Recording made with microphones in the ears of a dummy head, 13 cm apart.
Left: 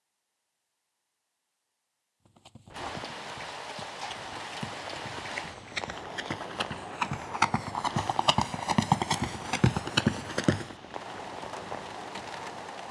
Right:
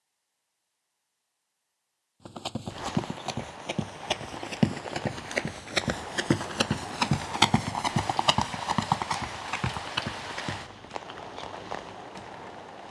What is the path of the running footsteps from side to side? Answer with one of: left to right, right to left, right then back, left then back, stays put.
right to left.